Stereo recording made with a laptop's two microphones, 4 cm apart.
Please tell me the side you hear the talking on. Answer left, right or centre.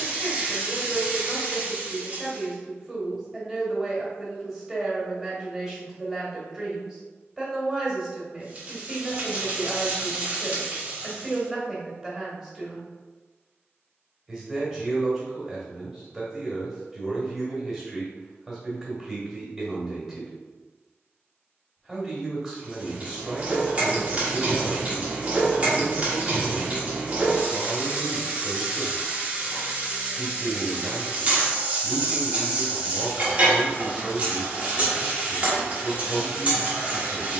centre.